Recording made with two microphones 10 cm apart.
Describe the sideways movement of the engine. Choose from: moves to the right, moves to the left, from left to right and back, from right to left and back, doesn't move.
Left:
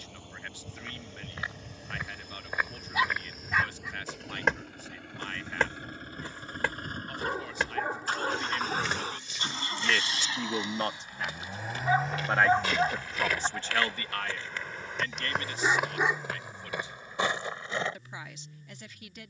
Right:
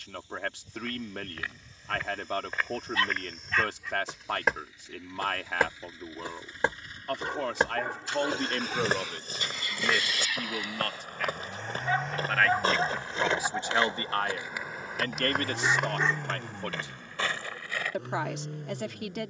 moves to the right.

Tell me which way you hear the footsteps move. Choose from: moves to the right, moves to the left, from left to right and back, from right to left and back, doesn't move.
from left to right and back.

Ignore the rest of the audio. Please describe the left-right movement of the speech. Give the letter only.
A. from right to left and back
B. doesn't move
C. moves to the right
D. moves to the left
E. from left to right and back
A.